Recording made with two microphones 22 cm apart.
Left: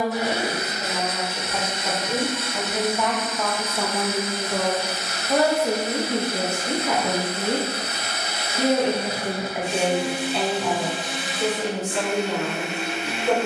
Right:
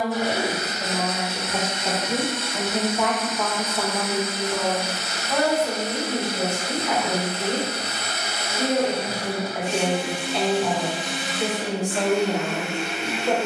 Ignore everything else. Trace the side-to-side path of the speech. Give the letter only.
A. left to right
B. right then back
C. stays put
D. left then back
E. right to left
D.